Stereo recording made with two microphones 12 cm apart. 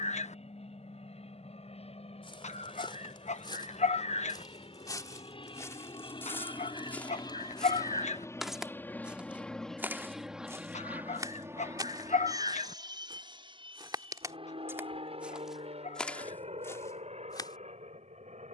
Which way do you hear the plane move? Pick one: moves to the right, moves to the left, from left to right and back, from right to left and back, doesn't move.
moves to the right.